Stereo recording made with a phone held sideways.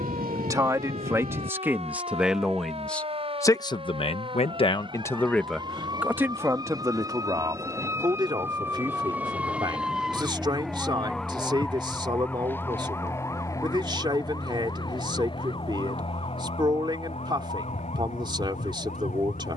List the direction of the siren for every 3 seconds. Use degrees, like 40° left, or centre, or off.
50° right, 40° right, 20° right, centre, 20° left, 40° left, 50° left.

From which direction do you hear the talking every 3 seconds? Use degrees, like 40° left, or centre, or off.
10° right, 30° left, 20° right, 30° right, 30° right, 30° right, 30° right.